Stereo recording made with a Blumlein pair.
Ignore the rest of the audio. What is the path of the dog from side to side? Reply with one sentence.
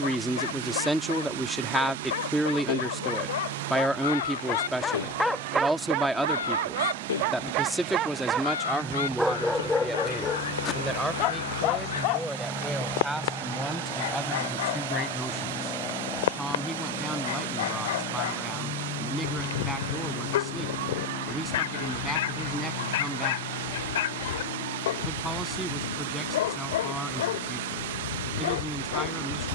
You can hear the dog go right and come back.